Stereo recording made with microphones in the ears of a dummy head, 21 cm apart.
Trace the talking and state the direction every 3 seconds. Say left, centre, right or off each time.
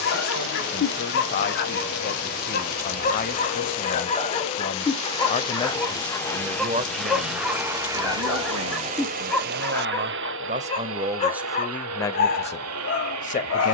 left, left, right, right, left.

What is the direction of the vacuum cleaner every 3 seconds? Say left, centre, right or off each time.
left, left, centre, right, right.